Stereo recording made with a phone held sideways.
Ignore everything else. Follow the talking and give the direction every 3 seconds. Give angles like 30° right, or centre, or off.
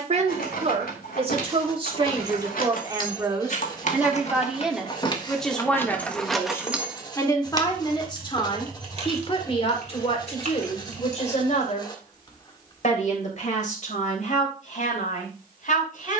30° right, 10° right, 20° left, 40° left, 50° left, 60° left.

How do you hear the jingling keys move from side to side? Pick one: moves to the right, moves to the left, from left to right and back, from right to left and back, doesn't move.
moves to the right.